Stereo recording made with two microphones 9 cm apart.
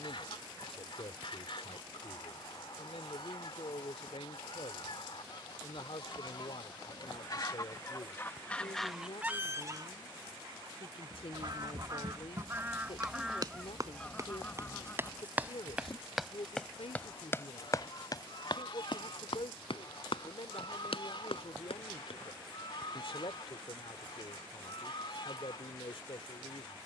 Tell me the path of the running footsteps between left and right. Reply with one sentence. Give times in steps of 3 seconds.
In this clip you hear the running footsteps not at all from 0 s, on the right from 9 s, in the centre from 15 s, on the left from 18 s and not at all from 24 s.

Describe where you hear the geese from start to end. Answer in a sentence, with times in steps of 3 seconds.
You can hear the geese on the left from 0 s, on the right from 9 s, in the centre from 12 s and on the left from 15 s.